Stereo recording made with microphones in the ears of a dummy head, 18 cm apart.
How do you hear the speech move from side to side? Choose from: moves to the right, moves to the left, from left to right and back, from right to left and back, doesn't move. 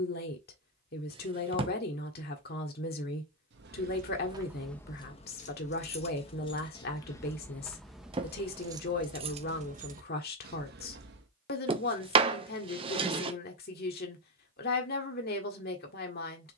doesn't move.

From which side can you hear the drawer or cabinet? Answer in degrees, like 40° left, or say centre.
30° right.